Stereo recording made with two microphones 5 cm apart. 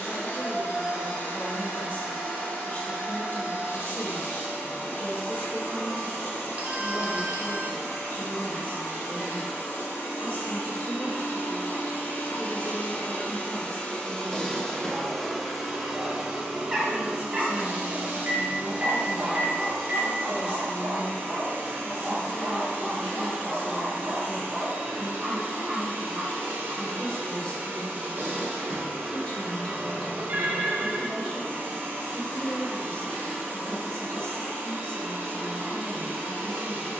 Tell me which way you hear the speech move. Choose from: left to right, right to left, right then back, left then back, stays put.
right then back.